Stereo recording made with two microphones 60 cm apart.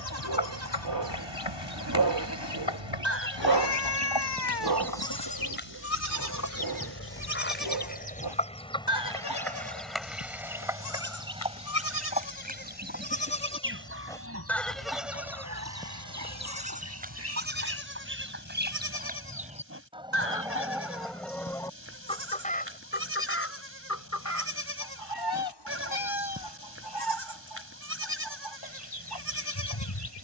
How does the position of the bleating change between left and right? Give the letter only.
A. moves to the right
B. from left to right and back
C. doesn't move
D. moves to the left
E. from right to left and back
E.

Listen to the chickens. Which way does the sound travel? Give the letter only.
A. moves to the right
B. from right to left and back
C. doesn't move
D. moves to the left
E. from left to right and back
E.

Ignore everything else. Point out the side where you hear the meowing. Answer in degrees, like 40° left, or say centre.
40° left.